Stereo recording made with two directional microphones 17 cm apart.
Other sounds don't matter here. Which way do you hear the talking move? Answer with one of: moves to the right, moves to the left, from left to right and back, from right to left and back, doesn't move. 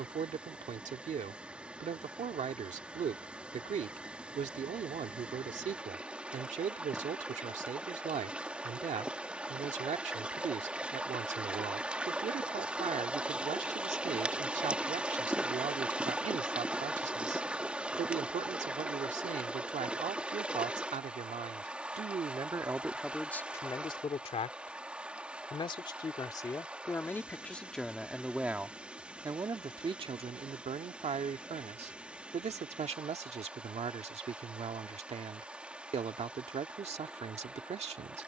from right to left and back.